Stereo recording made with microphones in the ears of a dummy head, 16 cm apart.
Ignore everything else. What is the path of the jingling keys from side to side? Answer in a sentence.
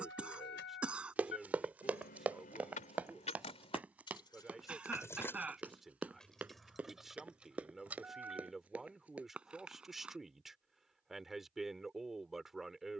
You can hear the jingling keys travel towards the right.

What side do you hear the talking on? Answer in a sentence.
In this clip you hear the talking in the centre.